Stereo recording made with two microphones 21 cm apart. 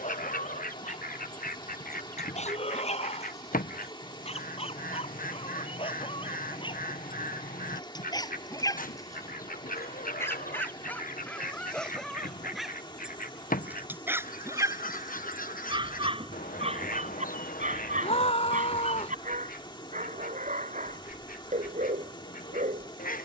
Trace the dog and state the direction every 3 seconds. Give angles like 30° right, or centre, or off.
30° left, 30° left, 20° left, 10° left, 10° right, 30° right, 40° right, 40° right.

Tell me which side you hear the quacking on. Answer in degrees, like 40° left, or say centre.
40° left.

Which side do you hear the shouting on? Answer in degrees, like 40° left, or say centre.
30° left.